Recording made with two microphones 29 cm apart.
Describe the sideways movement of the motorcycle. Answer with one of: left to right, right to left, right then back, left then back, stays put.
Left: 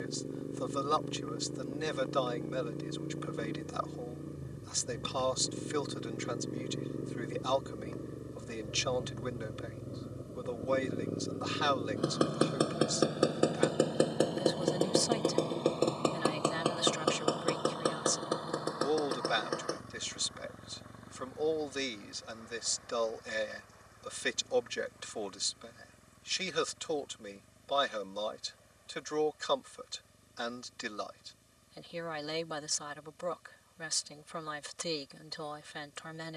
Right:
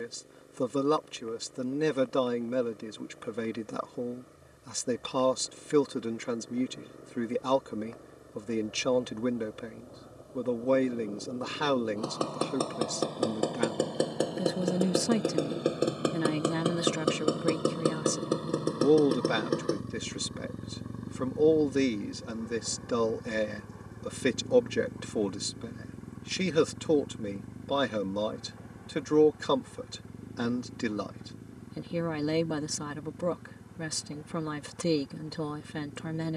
left to right.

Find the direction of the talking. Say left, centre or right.
right.